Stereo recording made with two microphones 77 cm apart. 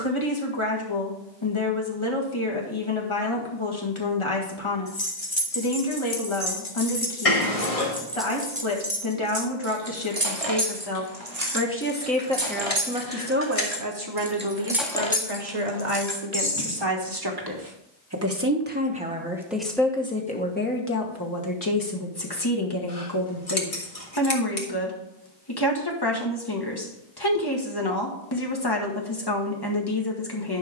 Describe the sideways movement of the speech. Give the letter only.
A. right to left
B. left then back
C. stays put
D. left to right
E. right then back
E.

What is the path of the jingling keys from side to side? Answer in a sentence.
In this clip you hear the jingling keys go right and come back.